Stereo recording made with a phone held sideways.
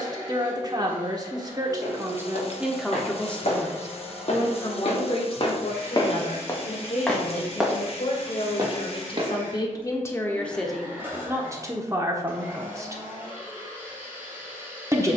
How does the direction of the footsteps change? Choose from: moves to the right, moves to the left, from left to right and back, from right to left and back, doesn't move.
moves to the right.